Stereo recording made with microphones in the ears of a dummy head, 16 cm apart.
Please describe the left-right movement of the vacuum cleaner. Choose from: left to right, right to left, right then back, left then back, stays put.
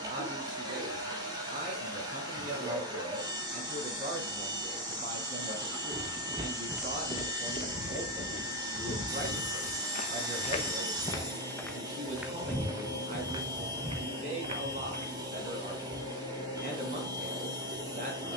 stays put.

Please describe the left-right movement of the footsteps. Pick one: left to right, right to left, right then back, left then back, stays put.
left then back.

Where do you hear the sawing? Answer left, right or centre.
right.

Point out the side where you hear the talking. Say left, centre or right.
right.